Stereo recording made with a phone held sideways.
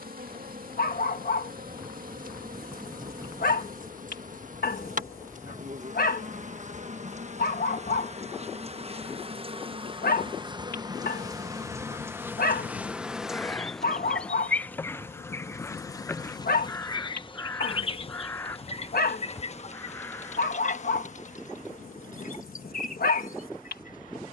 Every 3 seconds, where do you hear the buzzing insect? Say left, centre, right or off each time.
right, right, right, right, centre, left, left, left.